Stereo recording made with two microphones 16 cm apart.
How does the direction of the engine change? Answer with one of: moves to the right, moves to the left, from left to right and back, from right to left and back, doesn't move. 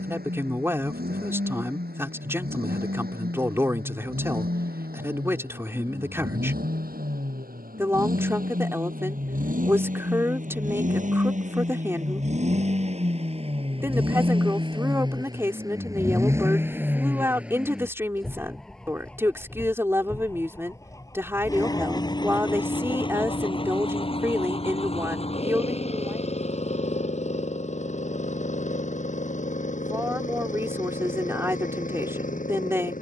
moves to the left.